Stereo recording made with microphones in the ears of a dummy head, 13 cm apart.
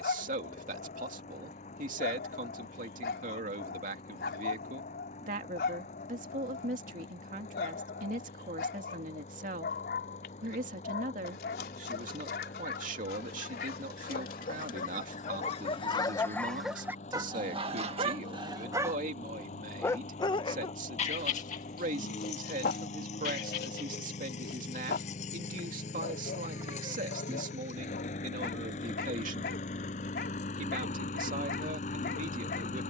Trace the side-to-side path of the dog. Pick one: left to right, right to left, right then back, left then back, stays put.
right then back.